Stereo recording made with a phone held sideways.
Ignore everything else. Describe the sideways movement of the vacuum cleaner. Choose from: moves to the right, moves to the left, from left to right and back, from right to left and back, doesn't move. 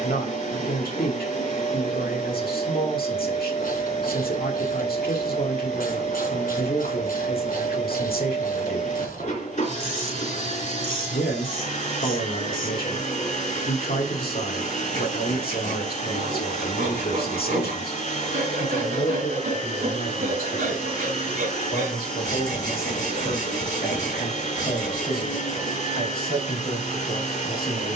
doesn't move.